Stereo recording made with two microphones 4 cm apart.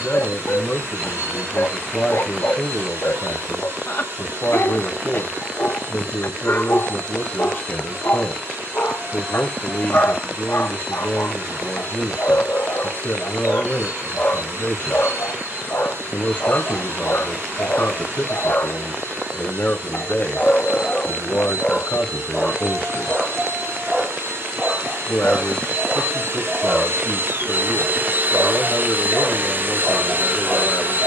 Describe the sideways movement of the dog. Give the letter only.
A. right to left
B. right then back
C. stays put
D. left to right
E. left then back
D.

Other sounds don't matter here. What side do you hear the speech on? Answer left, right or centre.
left.